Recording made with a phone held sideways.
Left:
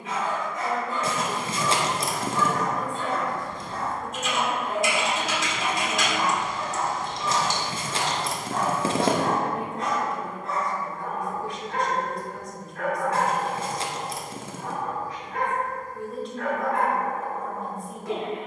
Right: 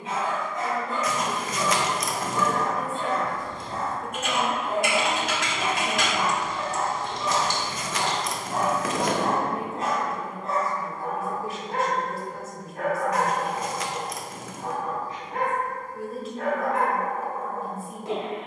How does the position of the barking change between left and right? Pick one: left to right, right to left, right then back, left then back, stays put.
stays put.